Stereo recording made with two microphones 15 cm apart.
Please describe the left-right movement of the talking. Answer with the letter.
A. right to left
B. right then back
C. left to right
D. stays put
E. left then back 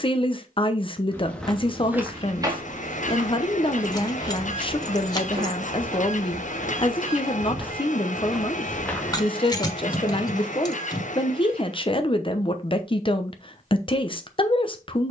D.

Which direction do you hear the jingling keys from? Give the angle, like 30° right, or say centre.
30° left.